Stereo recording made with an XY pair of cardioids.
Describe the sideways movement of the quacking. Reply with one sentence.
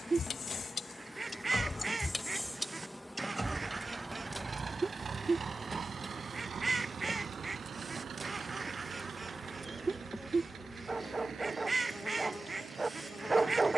You can hear the quacking stay in one place.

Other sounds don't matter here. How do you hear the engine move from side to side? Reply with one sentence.
You can hear the engine move from left to right.